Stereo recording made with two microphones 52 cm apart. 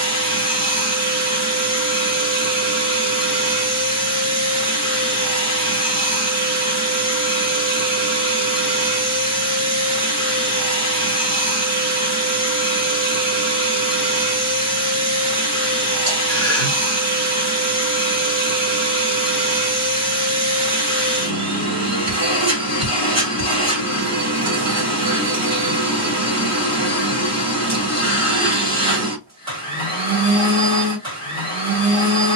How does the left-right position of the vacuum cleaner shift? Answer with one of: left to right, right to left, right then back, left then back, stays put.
stays put.